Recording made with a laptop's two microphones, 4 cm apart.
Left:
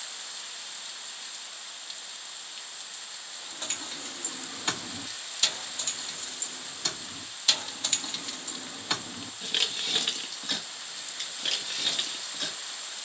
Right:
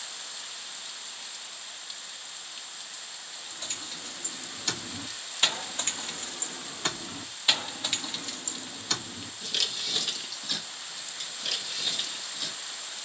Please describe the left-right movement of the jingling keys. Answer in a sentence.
In this clip you hear the jingling keys move from left to right and back again.